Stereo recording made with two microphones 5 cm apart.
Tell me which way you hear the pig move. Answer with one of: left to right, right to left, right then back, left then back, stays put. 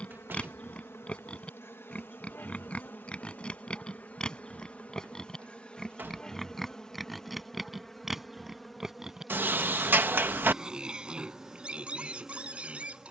left to right.